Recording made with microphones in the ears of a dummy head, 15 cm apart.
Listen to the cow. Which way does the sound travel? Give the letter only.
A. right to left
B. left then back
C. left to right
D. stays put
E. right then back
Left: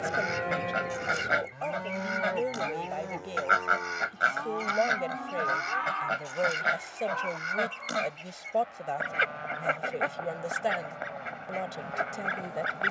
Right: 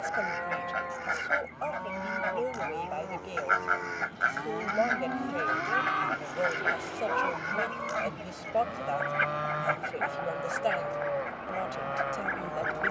C.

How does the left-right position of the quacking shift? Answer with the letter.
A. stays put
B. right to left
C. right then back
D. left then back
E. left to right
A.